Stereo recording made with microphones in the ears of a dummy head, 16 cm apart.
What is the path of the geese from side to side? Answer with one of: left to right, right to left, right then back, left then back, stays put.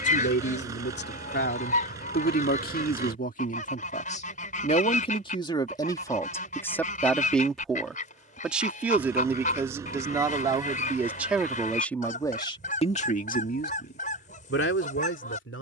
stays put.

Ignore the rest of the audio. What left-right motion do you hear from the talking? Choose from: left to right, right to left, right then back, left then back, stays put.
right then back.